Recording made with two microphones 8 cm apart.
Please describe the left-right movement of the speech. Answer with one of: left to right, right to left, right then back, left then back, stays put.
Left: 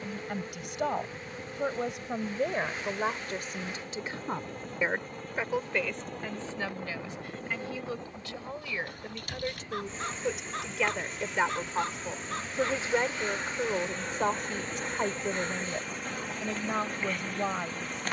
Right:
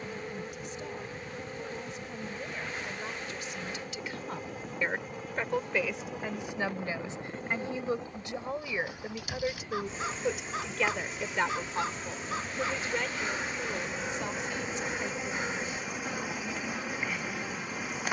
right then back.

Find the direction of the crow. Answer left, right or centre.
centre.